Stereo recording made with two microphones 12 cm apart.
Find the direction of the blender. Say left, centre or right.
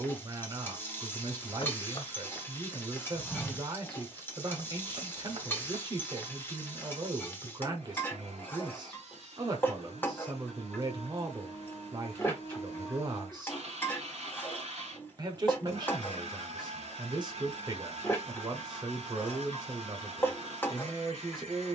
right.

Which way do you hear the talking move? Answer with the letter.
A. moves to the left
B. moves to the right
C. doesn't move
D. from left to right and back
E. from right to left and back
C.